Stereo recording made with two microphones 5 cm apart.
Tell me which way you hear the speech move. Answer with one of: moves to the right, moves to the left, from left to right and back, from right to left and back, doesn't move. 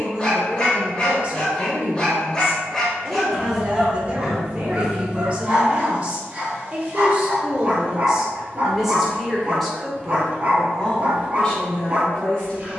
moves to the left.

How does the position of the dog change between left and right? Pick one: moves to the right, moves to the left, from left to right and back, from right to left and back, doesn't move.
moves to the right.